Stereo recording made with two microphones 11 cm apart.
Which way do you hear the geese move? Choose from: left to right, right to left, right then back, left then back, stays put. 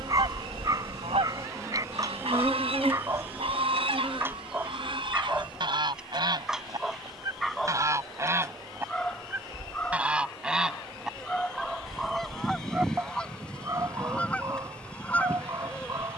right to left.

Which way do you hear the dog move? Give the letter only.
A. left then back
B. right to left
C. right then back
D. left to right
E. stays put
A.